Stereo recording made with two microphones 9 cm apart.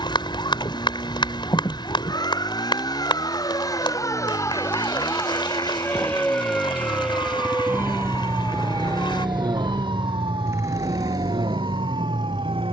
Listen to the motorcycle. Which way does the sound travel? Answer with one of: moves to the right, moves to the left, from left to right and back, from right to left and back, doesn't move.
moves to the right.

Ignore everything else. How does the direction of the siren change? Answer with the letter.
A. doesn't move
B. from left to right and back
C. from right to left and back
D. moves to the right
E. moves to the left
D.